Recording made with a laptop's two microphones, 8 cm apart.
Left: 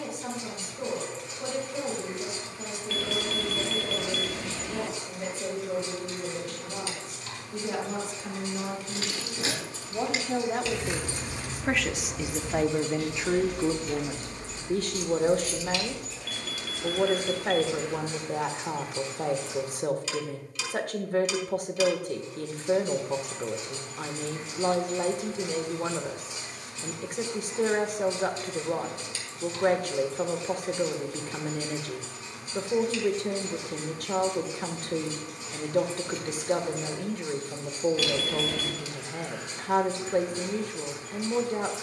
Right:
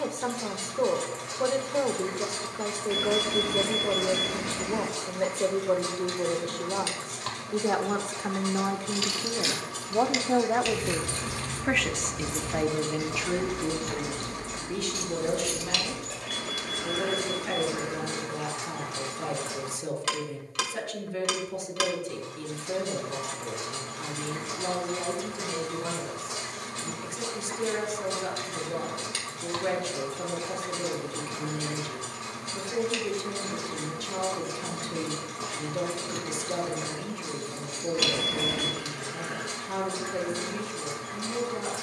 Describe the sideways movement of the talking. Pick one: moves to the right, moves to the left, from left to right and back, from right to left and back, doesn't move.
moves to the left.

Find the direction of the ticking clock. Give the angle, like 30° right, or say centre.
80° right.